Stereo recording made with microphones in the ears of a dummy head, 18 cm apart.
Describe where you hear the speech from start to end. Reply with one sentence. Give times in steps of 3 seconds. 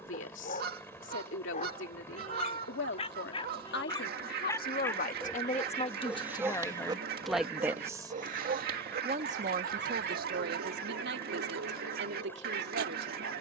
You can hear the speech on the left from 0 s, in the centre from 6 s and on the right from 9 s.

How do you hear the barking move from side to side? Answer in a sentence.
In this clip you hear the barking move from left to right.